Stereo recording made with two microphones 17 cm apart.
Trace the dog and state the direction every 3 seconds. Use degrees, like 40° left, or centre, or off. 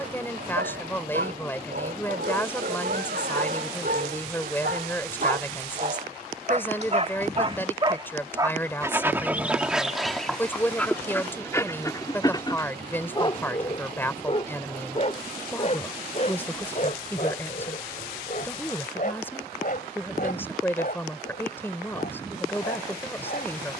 70° right, 60° right, 30° right, centre, 30° left, 50° left, 50° left, 60° left.